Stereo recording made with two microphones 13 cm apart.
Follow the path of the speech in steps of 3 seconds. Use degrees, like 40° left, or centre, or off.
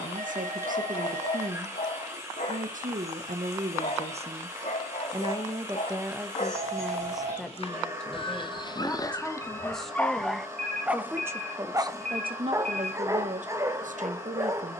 80° right, 50° right, centre, 10° right, 60° right.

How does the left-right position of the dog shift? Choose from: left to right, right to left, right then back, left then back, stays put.
left to right.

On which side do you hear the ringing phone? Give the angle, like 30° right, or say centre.
80° right.